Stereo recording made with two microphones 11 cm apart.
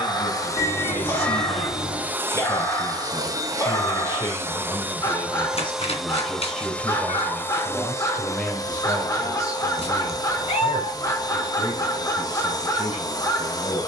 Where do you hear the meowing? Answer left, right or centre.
left.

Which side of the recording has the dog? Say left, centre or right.
left.